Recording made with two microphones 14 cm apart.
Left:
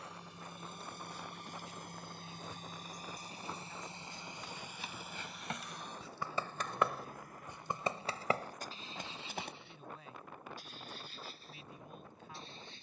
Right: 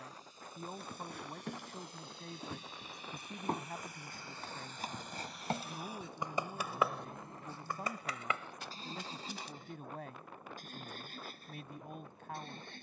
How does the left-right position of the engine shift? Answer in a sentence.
You can hear the engine go from the left side to the right.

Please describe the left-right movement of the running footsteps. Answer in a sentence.
You can hear the running footsteps move from right to left.